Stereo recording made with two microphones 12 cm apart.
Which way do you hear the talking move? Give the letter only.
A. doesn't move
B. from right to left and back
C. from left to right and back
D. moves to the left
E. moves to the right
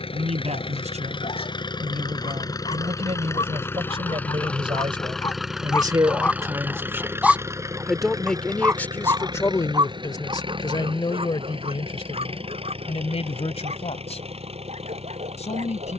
D.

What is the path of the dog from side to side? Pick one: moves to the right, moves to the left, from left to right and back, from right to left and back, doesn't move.
moves to the right.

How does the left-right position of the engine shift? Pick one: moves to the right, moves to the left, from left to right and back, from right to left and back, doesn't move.
moves to the right.